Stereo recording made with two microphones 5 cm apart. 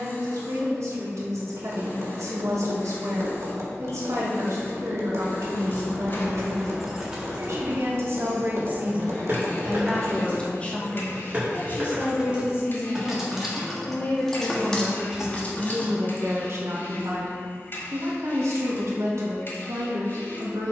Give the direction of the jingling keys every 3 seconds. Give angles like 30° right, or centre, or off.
off, 40° left, 10° right, 30° right, centre, 30° left, off.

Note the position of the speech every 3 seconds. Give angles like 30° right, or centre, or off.
70° right, 70° right, 60° right, 20° left, 30° left, 40° right, 60° right.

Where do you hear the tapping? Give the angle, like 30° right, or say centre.
60° right.